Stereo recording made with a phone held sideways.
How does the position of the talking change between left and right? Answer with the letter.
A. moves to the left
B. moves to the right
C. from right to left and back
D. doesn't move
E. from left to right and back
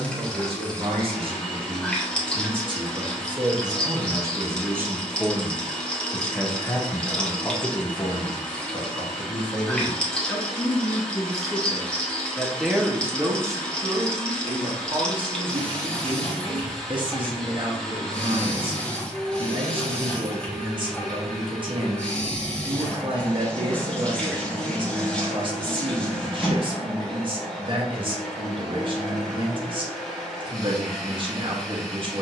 C.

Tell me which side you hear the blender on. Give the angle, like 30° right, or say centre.
centre.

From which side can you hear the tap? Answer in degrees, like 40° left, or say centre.
10° left.